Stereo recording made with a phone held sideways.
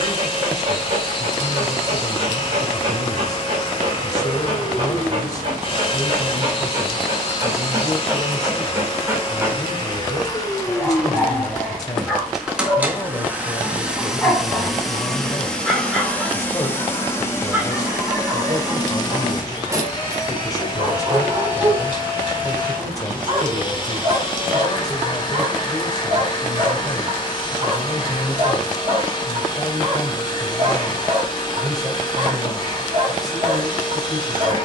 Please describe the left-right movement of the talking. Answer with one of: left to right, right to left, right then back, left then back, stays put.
stays put.